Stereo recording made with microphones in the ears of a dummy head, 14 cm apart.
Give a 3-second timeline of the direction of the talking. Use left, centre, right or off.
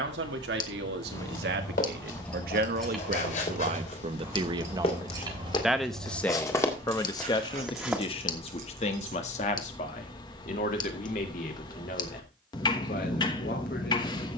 right, right, left, left, left.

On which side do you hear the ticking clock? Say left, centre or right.
left.